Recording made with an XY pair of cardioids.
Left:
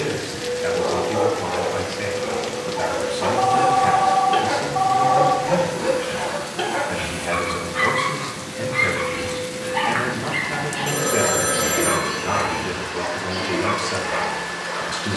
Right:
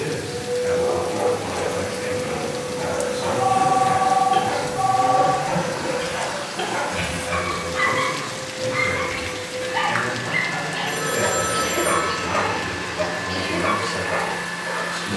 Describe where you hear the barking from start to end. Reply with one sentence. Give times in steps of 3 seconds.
You can hear the barking on the left from 0 s, in the centre from 6 s and on the right from 9 s.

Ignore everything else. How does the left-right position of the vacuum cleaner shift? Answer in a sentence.
In this clip you hear the vacuum cleaner stay put.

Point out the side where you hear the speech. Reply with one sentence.
In this clip you hear the speech on the left.